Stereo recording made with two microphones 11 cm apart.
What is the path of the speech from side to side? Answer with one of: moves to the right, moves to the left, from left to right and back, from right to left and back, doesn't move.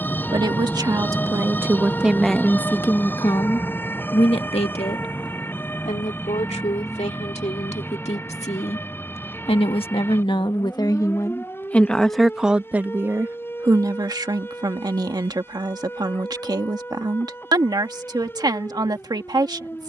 from right to left and back.